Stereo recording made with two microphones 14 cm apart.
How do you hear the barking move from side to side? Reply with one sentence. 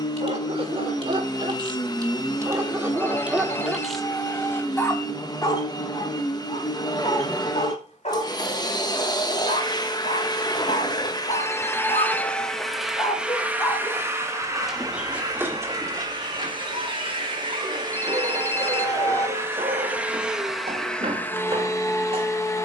You can hear the barking go left and come back.